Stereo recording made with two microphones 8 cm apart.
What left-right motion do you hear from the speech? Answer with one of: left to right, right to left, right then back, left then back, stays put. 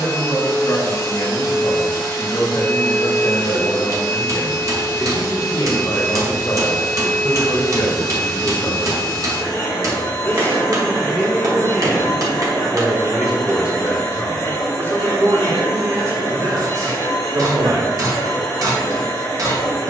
left to right.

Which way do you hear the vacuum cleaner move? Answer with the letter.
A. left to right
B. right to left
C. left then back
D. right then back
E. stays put
E.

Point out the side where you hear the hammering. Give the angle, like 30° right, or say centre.
50° right.